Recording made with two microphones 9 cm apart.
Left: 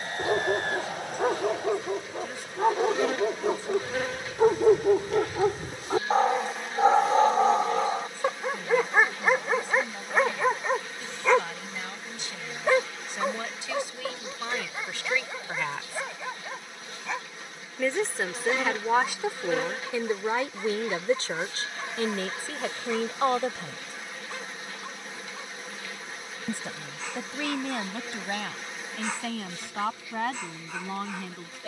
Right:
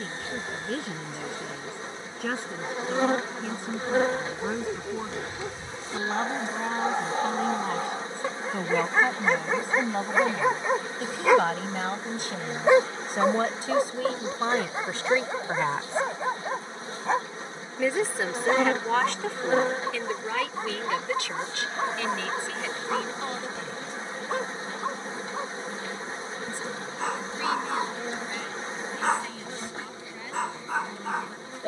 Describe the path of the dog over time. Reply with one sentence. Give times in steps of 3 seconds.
You can hear the dog on the left from 0 s, in the centre from 9 s and on the right from 12 s.